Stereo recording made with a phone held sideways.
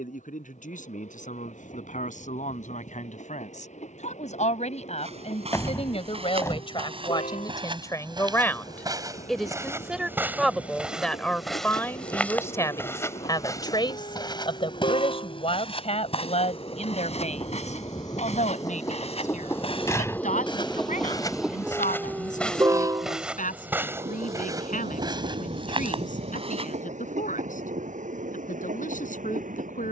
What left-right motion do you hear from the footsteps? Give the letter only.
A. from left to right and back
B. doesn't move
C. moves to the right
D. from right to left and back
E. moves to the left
D.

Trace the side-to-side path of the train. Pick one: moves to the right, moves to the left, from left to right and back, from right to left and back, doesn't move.
moves to the right.